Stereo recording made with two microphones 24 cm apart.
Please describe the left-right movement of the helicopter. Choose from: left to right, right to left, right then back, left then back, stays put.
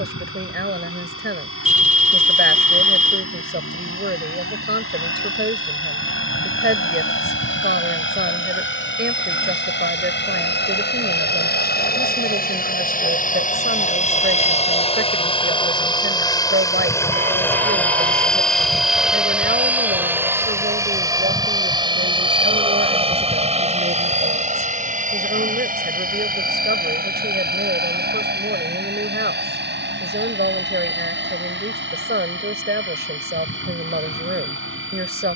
left to right.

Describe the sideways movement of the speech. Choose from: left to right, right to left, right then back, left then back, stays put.
stays put.